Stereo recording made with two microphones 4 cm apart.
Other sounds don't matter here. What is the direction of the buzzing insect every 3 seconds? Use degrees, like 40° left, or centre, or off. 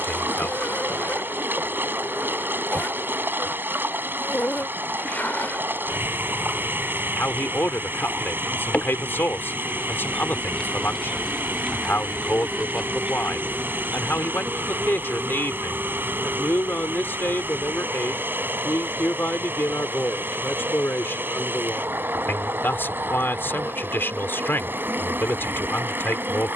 50° left, 50° left, 40° left, 20° left, 20° right, 50° right, 60° right, 60° right, 60° right.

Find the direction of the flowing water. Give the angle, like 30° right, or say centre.
60° right.